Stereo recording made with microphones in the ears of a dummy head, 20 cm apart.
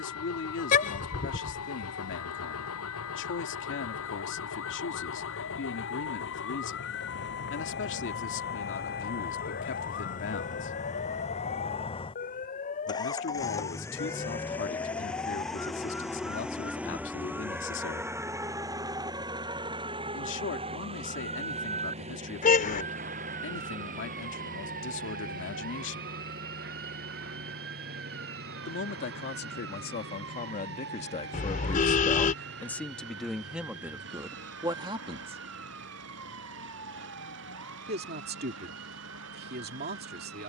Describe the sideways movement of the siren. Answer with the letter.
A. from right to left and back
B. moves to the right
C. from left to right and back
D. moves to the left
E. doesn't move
B.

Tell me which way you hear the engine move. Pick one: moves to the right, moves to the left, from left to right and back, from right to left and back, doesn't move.
moves to the right.